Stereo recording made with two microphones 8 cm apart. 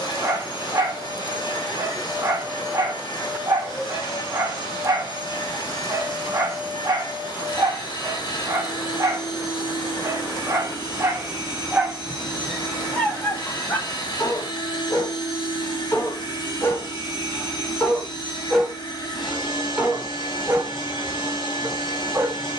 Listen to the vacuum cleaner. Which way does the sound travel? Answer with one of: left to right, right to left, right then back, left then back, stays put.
stays put.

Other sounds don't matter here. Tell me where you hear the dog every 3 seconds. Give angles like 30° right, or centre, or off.
40° right, 40° right, 40° right, 30° right, 20° left, 30° left, 10° right, 30° right.